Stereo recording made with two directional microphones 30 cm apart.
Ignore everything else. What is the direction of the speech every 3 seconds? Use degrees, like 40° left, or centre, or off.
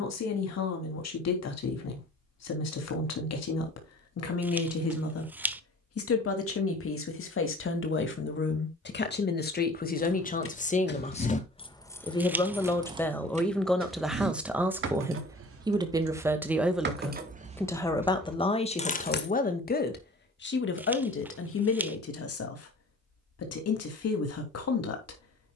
60° left, 50° left, 40° left, 30° left, centre, centre, 30° left, 50° left, 50° left.